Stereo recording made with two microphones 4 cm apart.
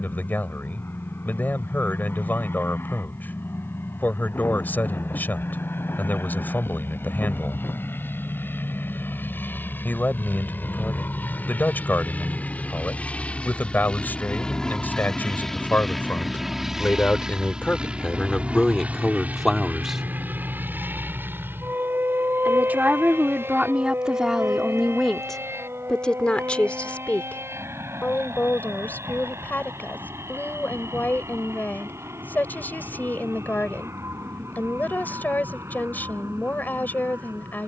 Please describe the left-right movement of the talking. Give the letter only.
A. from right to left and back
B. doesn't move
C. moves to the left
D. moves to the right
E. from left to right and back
E.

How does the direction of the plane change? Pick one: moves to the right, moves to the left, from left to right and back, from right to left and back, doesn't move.
moves to the right.